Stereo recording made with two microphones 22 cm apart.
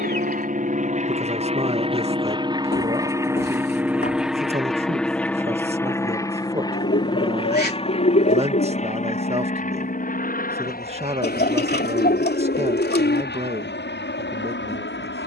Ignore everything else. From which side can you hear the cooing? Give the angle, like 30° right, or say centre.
50° left.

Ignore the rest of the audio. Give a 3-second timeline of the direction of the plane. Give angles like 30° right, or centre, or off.
30° right, centre, 20° left, 40° left, 50° left.